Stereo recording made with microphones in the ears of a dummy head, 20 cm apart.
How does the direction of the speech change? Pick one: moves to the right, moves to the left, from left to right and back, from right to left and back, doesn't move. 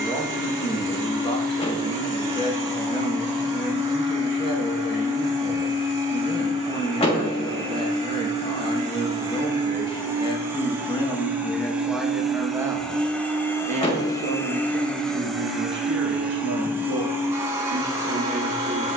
moves to the right.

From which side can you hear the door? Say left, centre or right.
left.